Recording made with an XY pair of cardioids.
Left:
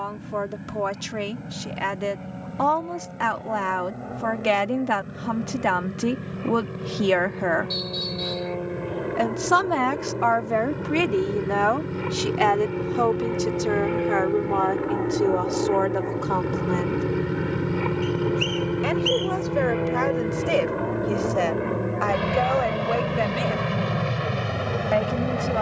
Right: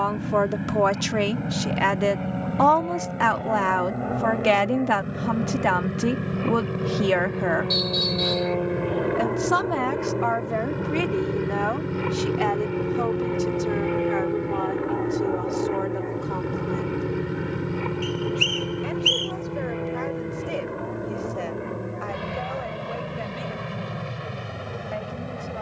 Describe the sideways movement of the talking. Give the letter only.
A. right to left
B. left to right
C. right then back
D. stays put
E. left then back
A.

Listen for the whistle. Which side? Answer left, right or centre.
right.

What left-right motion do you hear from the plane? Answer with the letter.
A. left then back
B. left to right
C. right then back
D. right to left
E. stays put
D.